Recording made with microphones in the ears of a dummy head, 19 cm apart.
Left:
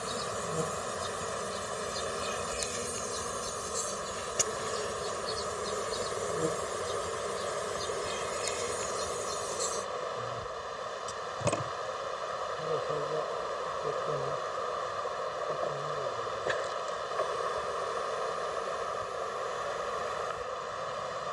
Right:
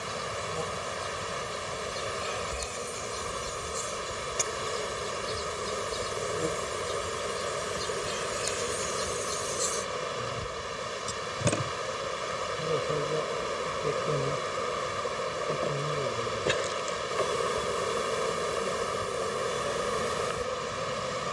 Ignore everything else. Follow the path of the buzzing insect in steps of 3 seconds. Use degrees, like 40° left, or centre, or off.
20° left, 10° left, centre, 20° right, 30° right, 40° right, 50° right.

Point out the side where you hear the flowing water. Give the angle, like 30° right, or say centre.
40° right.